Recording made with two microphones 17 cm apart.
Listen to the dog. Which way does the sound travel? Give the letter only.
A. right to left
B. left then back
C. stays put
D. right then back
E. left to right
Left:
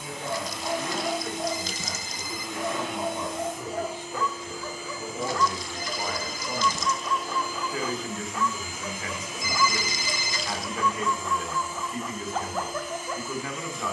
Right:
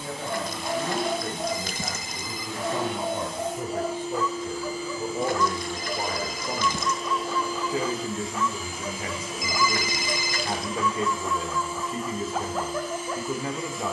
C.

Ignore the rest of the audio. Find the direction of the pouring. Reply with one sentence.
You can hear the pouring on the right.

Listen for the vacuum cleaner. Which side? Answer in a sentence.
In this clip you hear the vacuum cleaner on the right.